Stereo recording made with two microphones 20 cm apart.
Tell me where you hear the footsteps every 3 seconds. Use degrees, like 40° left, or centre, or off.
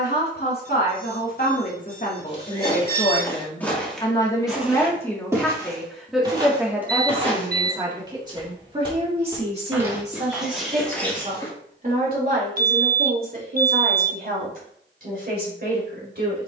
20° left, centre, 30° right, centre, off, off.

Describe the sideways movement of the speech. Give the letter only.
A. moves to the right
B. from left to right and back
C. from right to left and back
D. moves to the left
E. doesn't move
A.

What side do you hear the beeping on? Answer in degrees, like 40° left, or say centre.
50° right.